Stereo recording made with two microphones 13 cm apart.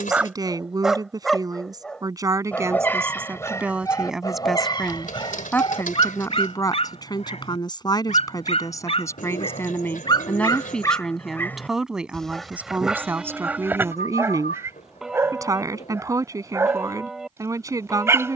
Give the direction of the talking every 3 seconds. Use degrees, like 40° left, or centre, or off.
30° right, centre, 30° left, 10° left, 20° right, 20° right.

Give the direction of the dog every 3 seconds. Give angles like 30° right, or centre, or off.
centre, 30° left, 50° left, 30° left, 10° right, 20° right.